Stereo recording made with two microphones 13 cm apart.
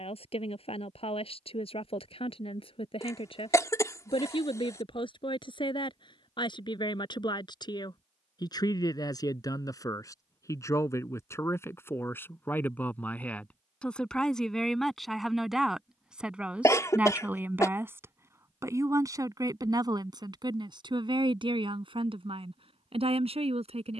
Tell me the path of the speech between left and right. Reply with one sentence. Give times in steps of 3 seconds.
You can hear the speech on the left from 0 s, in the centre from 12 s and on the right from 18 s.